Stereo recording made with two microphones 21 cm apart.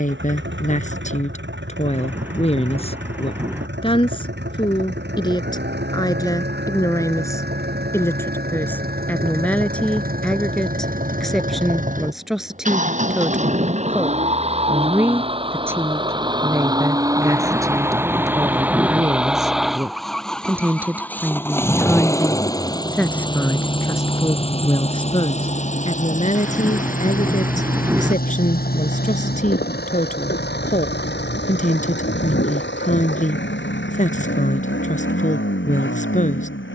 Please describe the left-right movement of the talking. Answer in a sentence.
You can hear the talking go right and come back.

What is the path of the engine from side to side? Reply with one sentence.
You can hear the engine move from right to left.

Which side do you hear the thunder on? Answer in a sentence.
You can hear the thunder in the centre.